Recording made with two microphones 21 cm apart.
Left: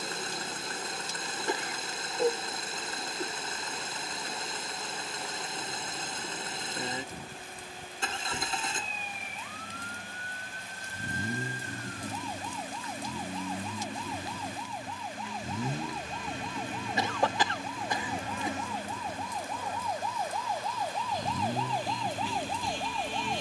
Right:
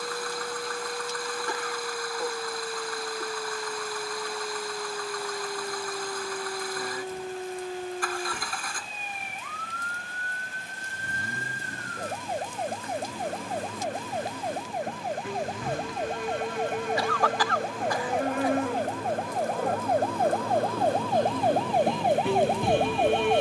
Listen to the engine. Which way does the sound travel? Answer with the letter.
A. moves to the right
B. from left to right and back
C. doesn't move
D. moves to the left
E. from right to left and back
C.